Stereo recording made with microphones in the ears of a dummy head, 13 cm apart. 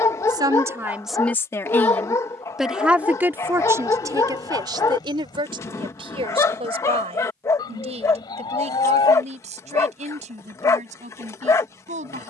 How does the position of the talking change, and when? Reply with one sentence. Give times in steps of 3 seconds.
You can hear the talking in the centre from 0 s and on the right from 3 s.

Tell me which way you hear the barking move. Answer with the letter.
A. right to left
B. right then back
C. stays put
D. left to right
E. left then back
C.